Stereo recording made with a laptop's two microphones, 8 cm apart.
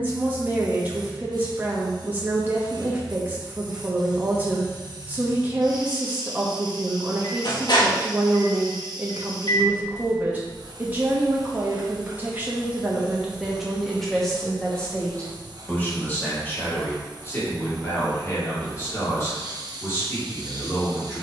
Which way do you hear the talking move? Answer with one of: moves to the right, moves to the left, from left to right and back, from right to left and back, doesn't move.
moves to the left.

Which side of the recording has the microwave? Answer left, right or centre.
left.